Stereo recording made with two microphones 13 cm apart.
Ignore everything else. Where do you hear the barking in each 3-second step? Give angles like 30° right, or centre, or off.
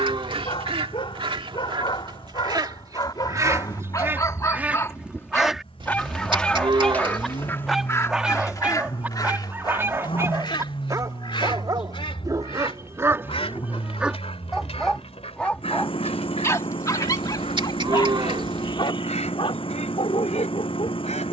40° left, 30° left, centre, 20° right, 20° right, 20° left, 50° left.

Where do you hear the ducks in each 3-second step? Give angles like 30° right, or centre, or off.
40° right, 20° right, 20° left, 40° left, 50° left, 60° left, 60° left.